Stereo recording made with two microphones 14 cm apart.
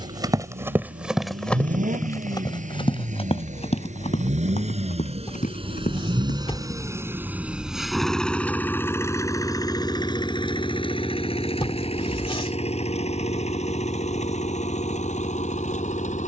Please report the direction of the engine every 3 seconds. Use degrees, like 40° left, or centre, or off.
80° right, 60° right, 10° right, 30° left, 50° left, 60° left.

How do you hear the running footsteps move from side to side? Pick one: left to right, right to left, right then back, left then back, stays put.
right to left.